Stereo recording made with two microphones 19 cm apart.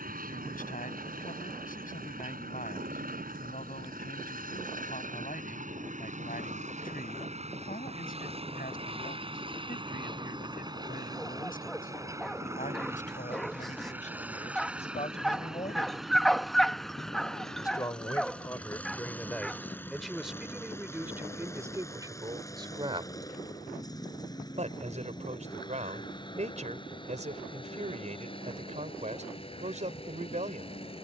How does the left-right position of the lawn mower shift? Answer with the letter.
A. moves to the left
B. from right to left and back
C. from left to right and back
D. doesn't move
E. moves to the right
A.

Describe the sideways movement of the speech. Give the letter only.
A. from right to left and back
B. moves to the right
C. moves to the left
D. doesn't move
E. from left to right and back
B.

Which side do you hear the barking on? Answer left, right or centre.
centre.